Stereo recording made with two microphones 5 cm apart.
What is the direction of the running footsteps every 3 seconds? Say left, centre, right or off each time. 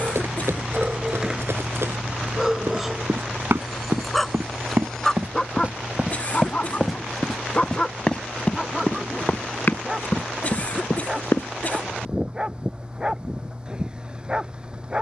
right, right, centre, left, off.